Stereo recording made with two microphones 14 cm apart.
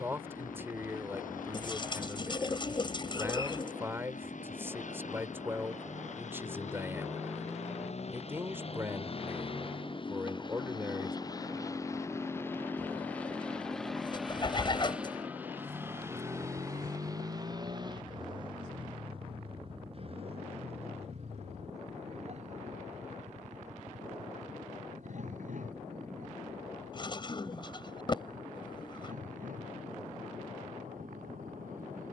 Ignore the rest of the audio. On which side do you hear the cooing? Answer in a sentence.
You can hear the cooing on the left.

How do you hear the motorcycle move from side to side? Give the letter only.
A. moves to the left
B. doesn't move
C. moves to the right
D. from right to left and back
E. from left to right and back
C.